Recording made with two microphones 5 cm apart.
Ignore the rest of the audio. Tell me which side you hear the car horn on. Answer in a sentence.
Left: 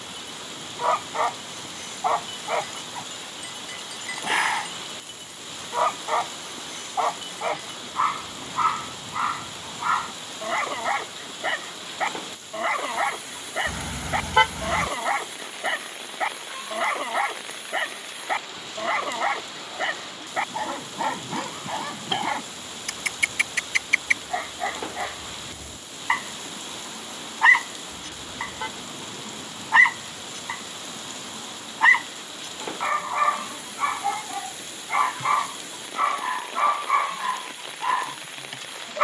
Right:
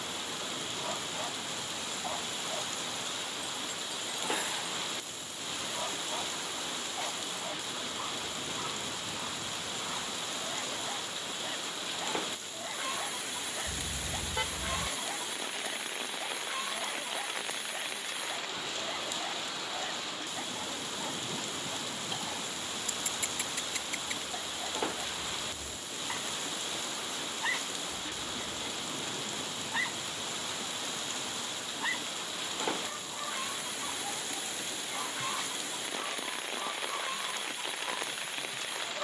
You can hear the car horn on the left.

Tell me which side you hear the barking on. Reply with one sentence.
You can hear the barking on the left.